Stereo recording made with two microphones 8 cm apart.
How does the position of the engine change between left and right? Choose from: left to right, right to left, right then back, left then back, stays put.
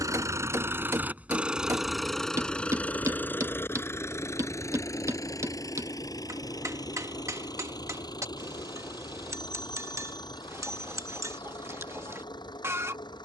right to left.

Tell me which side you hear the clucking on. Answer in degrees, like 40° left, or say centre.
30° right.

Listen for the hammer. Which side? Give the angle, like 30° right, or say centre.
40° right.